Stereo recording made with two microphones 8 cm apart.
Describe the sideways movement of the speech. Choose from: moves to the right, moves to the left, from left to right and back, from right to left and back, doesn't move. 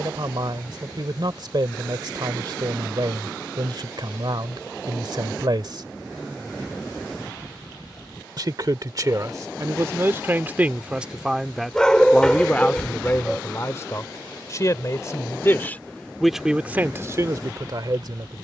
from right to left and back.